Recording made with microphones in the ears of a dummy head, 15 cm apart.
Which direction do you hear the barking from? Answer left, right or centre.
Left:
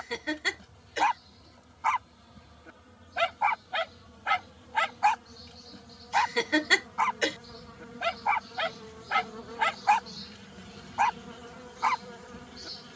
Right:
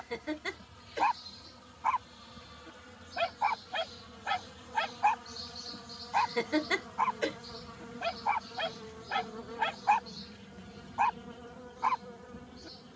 left.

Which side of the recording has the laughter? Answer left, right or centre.
left.